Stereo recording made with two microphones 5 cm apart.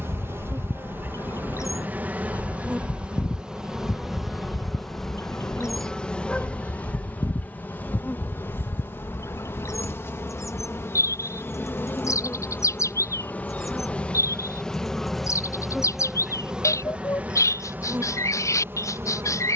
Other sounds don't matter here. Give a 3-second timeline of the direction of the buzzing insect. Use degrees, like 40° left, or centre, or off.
40° right, centre, 30° left, 50° left, 30° left, 20° right, 50° right.